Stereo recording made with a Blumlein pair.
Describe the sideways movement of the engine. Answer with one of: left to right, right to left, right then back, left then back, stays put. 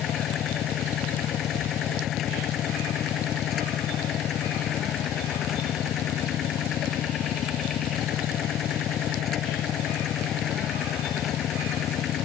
stays put.